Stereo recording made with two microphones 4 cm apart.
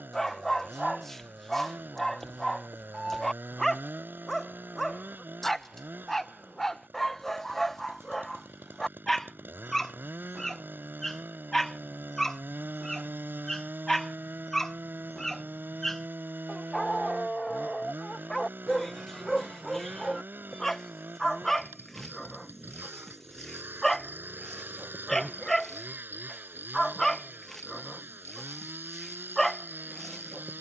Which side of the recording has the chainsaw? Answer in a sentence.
You can hear the chainsaw on the right.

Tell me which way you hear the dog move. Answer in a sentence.
You can hear the dog stay put.